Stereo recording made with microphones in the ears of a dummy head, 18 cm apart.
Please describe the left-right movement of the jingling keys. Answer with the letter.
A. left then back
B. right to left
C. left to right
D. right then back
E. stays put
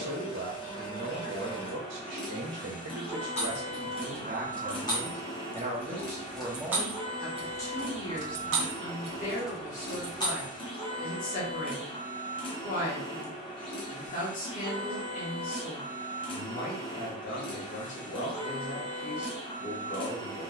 D.